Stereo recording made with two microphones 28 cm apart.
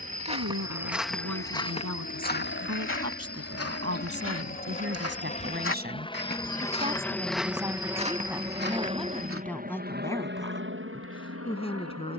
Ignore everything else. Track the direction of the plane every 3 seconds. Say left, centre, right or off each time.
left, left, centre, right.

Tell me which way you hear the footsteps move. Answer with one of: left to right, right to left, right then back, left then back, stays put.
left then back.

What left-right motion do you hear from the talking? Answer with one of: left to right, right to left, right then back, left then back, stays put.
right to left.